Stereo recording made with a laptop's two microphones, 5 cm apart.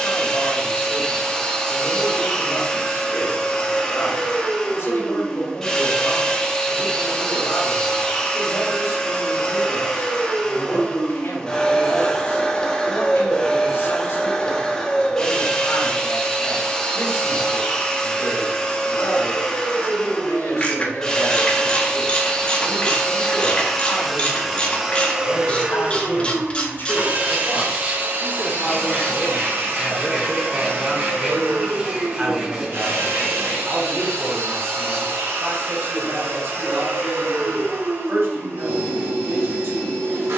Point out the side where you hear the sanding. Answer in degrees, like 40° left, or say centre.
20° right.